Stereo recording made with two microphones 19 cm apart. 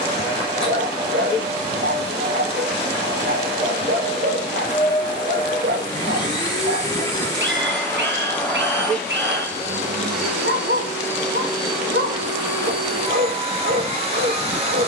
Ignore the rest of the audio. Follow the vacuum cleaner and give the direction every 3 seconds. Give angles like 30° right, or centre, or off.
30° left, 30° left, 10° left, 10° right, 30° right.